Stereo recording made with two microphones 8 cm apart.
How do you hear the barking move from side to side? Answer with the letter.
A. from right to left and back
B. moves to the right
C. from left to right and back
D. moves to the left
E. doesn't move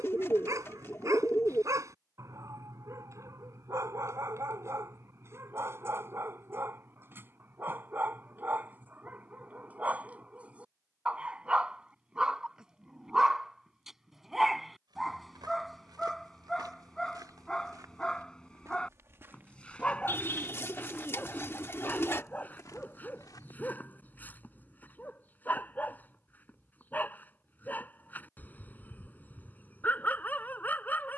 D.